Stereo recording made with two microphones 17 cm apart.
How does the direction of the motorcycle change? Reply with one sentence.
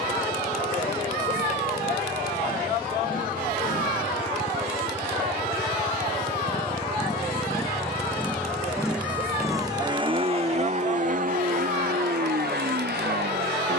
In this clip you hear the motorcycle move from left to right.